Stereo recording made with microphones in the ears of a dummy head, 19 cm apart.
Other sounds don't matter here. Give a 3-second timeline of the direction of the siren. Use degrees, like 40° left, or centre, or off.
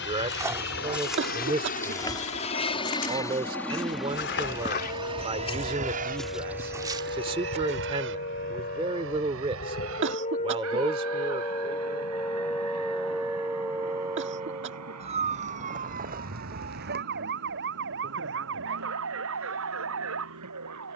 70° left, 60° left, 50° left, 30° left, 10° right, 40° right, 60° right.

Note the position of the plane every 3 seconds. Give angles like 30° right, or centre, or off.
40° left, 10° right, 50° right, 70° right, 70° right, 80° right, 80° right.